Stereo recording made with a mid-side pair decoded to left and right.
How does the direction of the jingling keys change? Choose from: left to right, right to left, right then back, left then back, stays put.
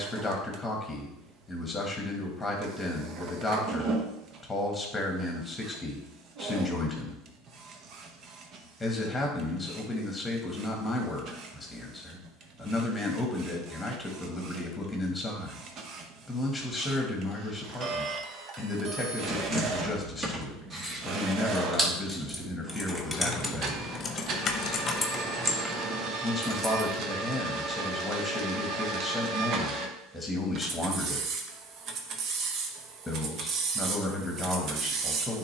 left then back.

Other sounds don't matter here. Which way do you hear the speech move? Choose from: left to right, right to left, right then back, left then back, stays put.
stays put.